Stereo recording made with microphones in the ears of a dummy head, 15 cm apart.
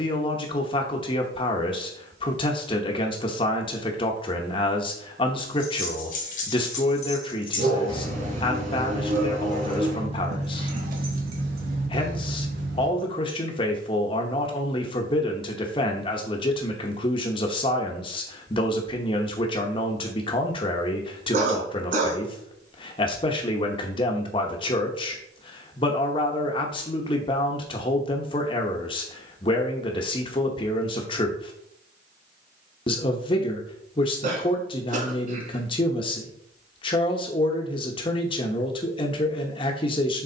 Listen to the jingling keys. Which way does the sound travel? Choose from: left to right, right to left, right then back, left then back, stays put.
left to right.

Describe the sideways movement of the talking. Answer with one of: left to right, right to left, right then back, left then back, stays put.
stays put.